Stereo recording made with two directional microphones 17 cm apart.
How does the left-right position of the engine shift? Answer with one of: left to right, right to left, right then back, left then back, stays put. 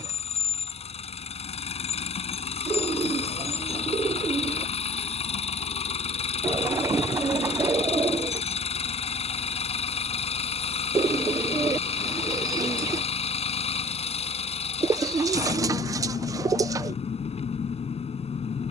stays put.